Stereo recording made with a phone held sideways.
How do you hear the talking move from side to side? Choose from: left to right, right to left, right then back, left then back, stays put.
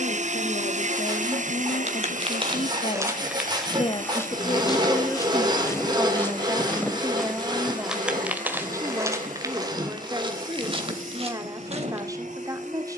left to right.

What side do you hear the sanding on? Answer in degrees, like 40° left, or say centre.
30° right.